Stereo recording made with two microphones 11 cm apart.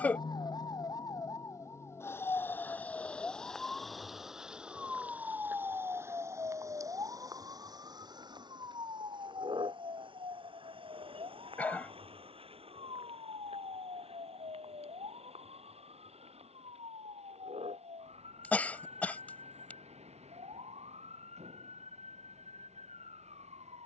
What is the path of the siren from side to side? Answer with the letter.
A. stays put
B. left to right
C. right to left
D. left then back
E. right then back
B.